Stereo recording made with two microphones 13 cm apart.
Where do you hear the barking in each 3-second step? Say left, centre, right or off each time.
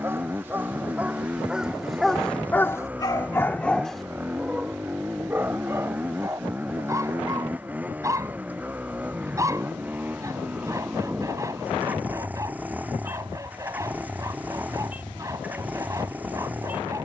centre, centre, right, right, right, right.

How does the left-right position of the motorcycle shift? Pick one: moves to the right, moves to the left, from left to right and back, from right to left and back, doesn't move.
doesn't move.